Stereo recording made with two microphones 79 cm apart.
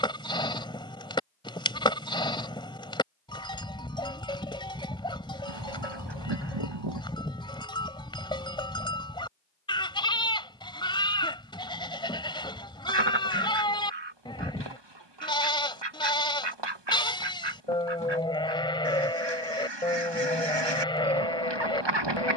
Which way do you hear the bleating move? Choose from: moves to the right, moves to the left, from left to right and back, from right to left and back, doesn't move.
doesn't move.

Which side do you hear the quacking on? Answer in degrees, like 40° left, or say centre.
30° right.